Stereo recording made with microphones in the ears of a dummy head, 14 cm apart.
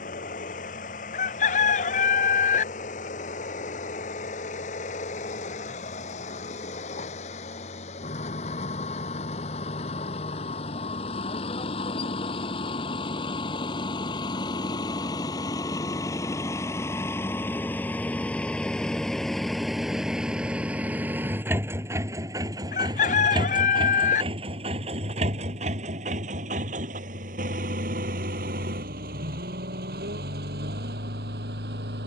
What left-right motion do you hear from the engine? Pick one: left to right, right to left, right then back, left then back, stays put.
left to right.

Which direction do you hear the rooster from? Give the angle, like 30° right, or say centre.
50° left.